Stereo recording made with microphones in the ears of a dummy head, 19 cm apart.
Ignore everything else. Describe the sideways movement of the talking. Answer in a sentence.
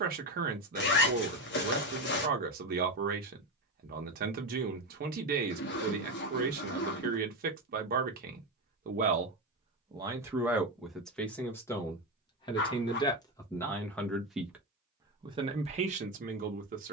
In this clip you hear the talking move from right to left and back again.